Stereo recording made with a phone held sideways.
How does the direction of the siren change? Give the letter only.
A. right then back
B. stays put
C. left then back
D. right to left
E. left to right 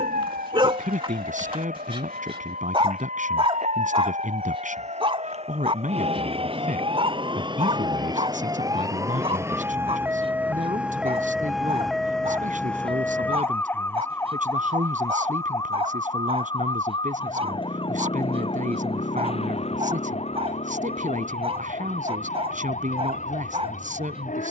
D.